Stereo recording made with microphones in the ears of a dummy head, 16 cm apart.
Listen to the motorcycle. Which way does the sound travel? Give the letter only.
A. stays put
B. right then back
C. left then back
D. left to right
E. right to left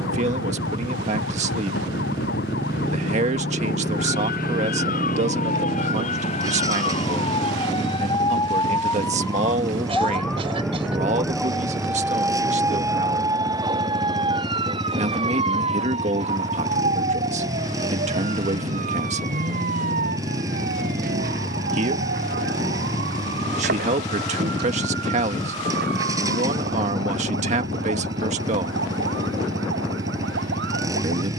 A.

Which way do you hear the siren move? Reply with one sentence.
In this clip you hear the siren move from left to right.